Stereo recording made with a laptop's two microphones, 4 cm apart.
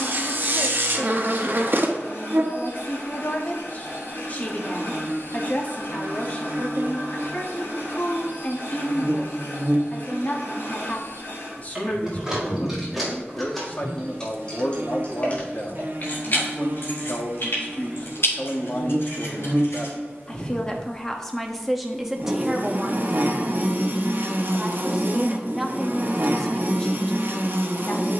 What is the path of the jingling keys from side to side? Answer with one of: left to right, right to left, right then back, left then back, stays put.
right to left.